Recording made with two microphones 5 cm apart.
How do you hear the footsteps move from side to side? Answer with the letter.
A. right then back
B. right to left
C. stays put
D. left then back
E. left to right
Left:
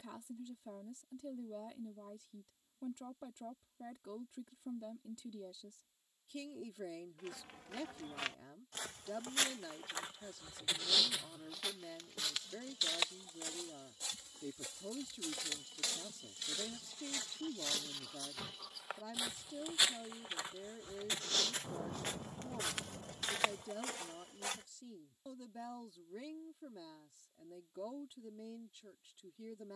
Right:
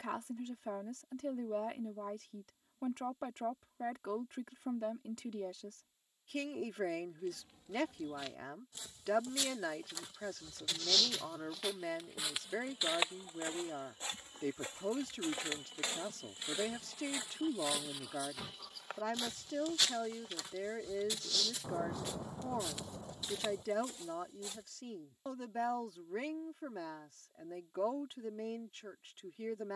A.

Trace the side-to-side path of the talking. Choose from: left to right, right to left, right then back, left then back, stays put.
stays put.